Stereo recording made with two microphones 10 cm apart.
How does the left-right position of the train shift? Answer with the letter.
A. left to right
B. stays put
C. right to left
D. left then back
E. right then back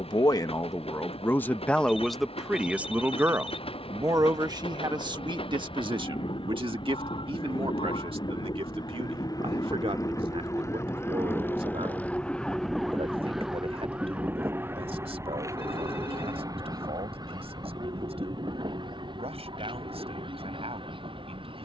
A.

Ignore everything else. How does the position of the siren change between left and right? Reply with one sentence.
You can hear the siren move to the right.